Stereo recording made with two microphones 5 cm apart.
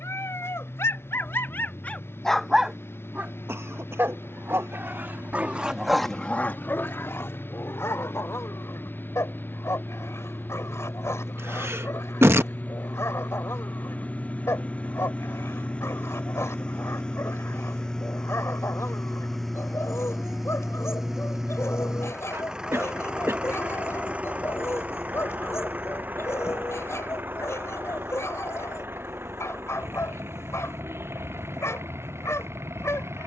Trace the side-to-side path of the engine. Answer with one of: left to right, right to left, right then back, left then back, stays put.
left to right.